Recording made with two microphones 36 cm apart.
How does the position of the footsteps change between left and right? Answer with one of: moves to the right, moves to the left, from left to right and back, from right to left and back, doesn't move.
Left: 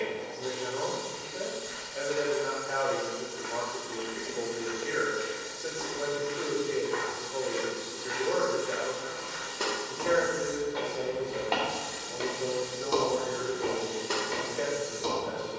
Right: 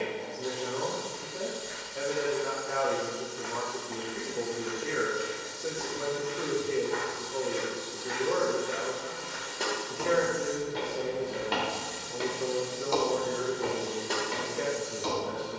from left to right and back.